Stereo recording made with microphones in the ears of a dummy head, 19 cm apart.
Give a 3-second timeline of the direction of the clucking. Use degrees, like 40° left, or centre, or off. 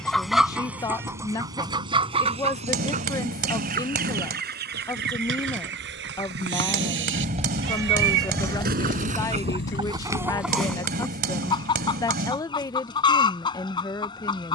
20° right, 50° right, 60° right, 10° right, 20° left.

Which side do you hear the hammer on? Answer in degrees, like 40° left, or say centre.
50° right.